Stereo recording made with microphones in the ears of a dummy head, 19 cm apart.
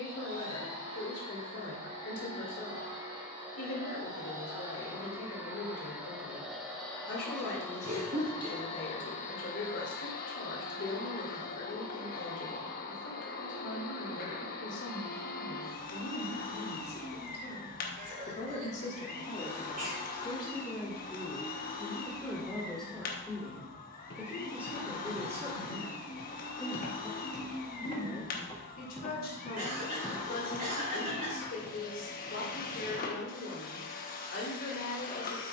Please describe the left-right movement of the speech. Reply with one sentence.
You can hear the speech go right and come back.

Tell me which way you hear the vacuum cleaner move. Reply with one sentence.
You can hear the vacuum cleaner go from the right side to the left.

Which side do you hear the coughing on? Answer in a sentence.
In this clip you hear the coughing on the right.